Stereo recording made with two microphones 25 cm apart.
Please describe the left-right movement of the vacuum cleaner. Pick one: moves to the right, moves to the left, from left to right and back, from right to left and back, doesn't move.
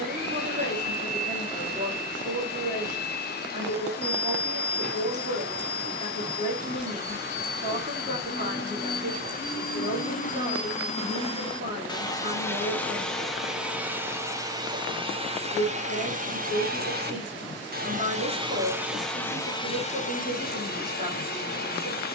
from left to right and back.